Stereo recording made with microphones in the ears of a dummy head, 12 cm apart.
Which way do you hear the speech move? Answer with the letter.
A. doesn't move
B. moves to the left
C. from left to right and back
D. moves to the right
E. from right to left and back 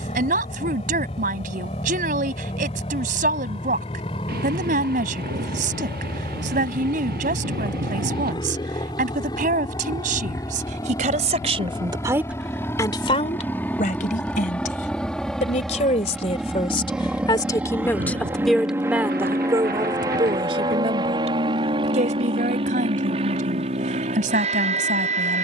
E.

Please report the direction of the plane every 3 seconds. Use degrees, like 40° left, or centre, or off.
50° left, 40° left, 40° left, 30° left, 10° left, centre, 20° right, 40° right, 50° right.